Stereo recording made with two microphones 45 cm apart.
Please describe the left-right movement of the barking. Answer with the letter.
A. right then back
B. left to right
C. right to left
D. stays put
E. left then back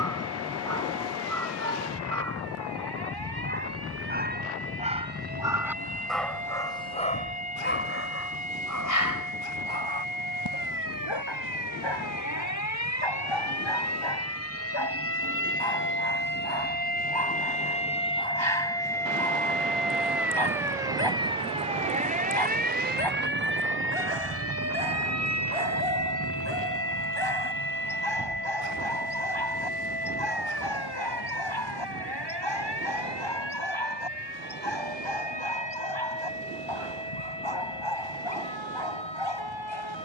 C.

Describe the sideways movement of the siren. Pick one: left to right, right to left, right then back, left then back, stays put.
left to right.